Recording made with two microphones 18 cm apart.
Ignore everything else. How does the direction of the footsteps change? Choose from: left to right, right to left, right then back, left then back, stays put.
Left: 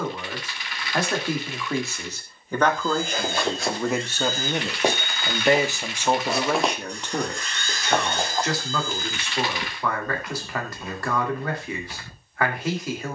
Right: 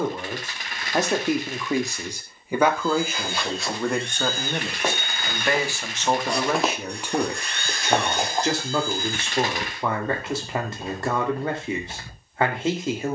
left to right.